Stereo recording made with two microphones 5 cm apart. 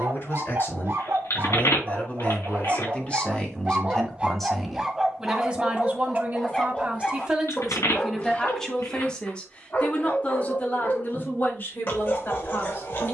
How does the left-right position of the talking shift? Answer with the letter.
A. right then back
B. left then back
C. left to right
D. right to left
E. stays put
A.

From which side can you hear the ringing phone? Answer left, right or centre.
left.